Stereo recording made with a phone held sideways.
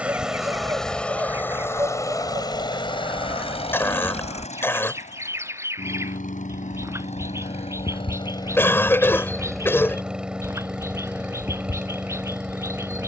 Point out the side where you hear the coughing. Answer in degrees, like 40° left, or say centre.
20° left.